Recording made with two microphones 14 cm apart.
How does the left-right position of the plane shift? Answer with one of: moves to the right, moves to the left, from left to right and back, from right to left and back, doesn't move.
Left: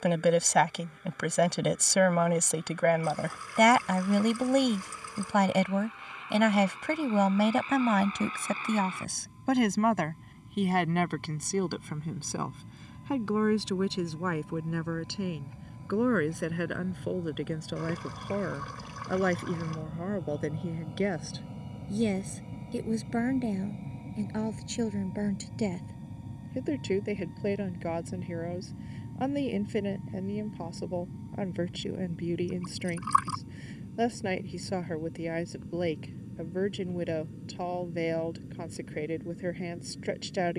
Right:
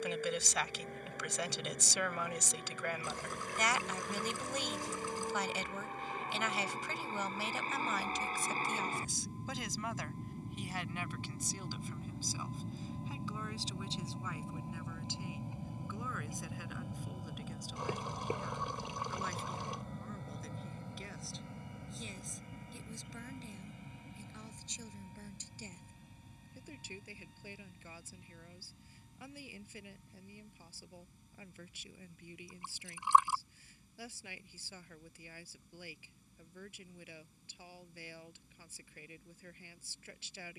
moves to the left.